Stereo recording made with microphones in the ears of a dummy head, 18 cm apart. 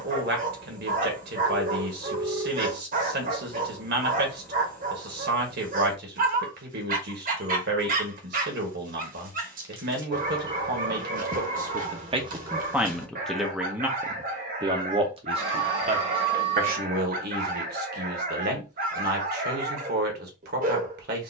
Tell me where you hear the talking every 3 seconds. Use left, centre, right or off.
right, right, right, right, centre, right, right.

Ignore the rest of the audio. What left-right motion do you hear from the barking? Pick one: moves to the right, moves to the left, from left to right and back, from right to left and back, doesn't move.
doesn't move.